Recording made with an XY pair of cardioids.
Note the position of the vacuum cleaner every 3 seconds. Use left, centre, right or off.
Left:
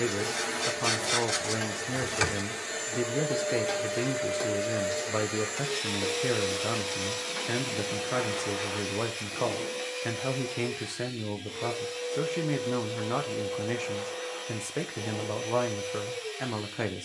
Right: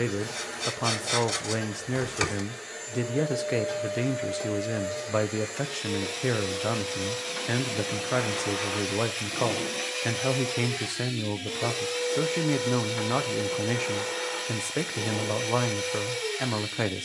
left, left, centre, right, right, right.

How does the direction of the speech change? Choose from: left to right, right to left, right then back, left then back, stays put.
stays put.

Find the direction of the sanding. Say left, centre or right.
centre.